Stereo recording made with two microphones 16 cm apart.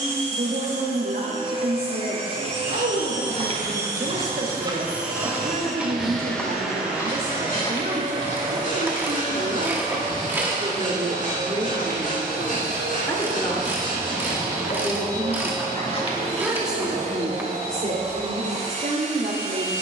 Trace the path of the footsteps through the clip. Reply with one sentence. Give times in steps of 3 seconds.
In this clip you hear the footsteps on the right from 0 s, on the left from 6 s and not at all from 18 s.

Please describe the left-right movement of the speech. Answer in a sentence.
You can hear the speech move from right to left and back again.